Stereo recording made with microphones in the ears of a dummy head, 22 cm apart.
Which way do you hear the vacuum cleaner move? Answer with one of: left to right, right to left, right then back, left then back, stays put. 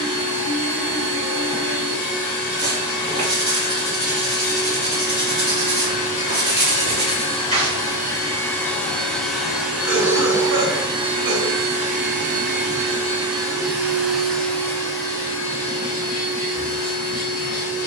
right then back.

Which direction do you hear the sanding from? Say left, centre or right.
right.